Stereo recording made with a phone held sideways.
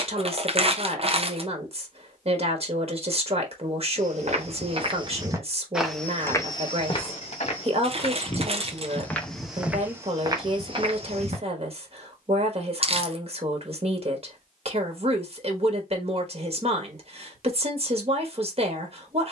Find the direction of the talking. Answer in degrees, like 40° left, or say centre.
40° right.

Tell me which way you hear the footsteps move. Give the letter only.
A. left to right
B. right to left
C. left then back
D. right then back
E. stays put
C.